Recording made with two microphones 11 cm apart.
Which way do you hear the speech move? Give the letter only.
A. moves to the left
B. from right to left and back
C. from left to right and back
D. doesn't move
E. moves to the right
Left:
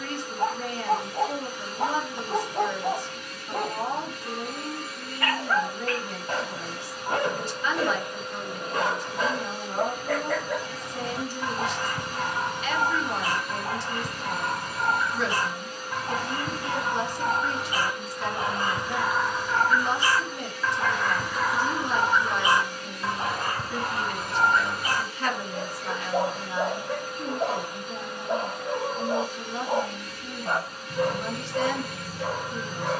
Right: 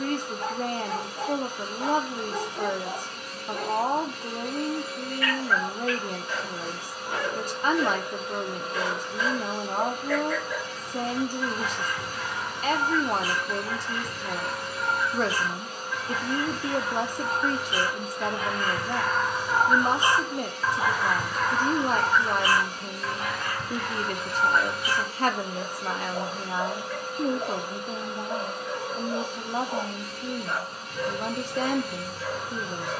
D.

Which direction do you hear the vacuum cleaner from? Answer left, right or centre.
right.